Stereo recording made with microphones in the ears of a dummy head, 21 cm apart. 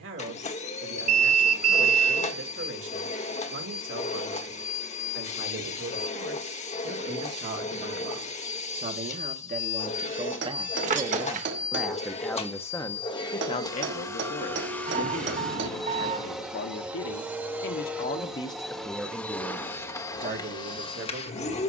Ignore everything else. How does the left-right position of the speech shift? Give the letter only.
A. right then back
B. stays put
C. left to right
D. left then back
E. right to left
D.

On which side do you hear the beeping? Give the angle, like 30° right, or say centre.
30° right.